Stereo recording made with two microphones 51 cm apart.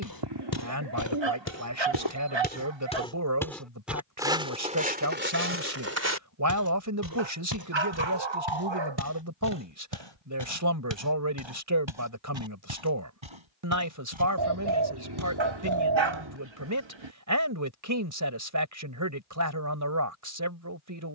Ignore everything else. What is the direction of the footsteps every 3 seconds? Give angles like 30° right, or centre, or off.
30° left, 10° right, 40° right, 60° right, 70° right, 70° right, off.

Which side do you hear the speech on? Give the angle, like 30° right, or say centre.
40° right.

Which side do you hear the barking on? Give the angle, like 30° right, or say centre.
60° right.